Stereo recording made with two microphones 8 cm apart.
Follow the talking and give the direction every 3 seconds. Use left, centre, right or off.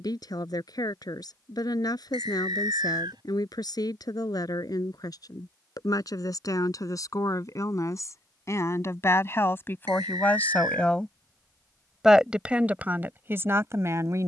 left, left, left, left, right.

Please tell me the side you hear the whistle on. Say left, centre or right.
right.